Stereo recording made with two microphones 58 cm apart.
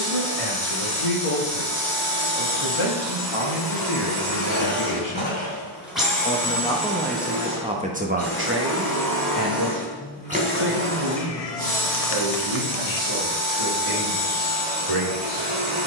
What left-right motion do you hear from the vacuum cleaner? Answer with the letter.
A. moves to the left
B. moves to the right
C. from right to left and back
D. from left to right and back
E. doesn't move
C.